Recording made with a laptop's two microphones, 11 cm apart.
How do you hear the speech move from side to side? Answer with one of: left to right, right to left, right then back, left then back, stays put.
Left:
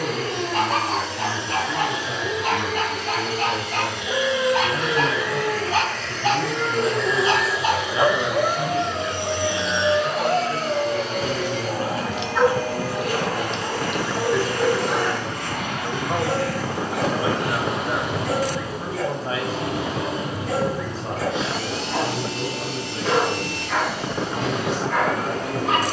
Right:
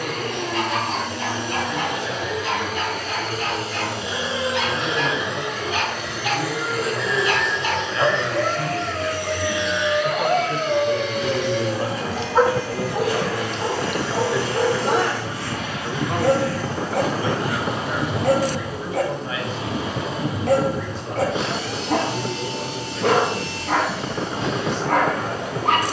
right then back.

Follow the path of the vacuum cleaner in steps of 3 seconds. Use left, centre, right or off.
right, right, centre, left, left, left, left, left, left.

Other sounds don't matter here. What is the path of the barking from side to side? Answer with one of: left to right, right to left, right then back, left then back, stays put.
left to right.